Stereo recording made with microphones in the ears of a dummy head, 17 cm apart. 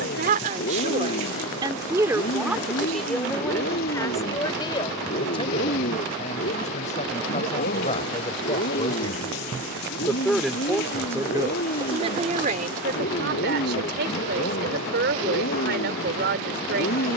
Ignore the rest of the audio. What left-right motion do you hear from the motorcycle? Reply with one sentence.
In this clip you hear the motorcycle stay in one place.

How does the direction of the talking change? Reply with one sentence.
You can hear the talking move from right to left and back again.